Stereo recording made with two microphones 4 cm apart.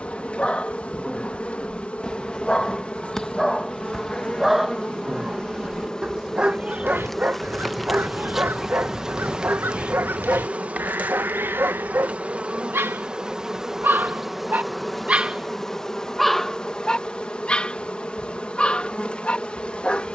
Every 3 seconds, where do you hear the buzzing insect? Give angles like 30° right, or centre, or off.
30° left, 30° left, centre, 30° right, 10° right, 20° left, 30° left.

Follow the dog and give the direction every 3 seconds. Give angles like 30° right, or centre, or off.
20° left, centre, 40° right, 60° right, 60° right, centre, 30° left.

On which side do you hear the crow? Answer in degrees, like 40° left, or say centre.
60° right.